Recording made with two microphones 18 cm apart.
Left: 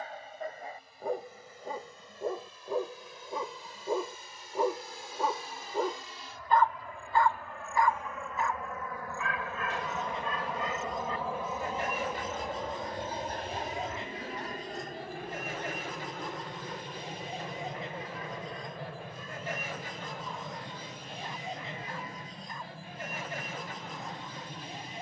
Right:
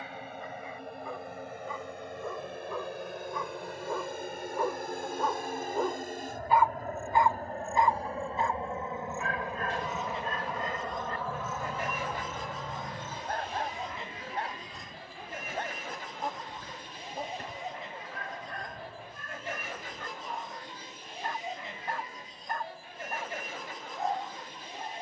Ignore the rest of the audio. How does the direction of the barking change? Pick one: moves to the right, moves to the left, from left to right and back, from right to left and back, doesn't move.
moves to the right.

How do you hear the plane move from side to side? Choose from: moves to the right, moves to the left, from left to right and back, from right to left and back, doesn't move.
moves to the left.